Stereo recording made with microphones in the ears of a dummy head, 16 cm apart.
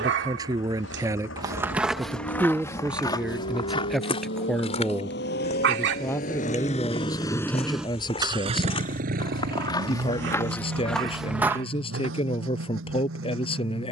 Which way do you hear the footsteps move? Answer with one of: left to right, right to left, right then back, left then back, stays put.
left then back.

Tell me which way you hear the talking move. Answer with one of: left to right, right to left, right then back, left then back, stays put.
right to left.